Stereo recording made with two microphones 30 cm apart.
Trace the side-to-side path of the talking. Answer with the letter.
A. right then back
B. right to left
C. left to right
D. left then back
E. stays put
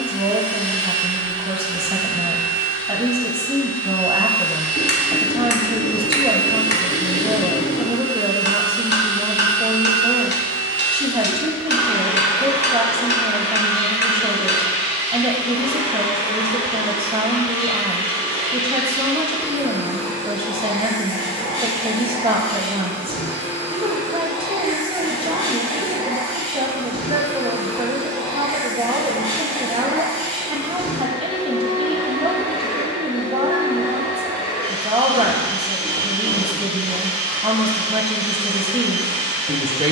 E.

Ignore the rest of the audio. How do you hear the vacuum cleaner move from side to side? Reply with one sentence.
You can hear the vacuum cleaner stay put.